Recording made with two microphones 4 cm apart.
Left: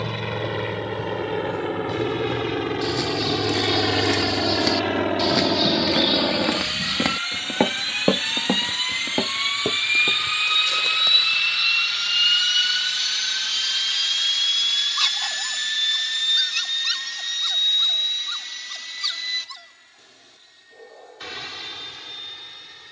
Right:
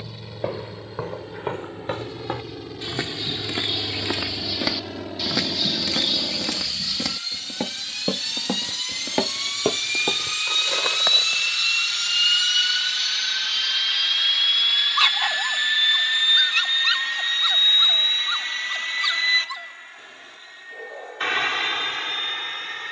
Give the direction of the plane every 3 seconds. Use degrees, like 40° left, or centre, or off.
70° left, 60° left, 50° left, 20° left, 10° right, 30° right, 40° right, 50° right.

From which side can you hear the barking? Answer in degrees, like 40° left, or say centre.
40° right.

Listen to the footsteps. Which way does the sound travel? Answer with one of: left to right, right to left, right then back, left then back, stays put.
left then back.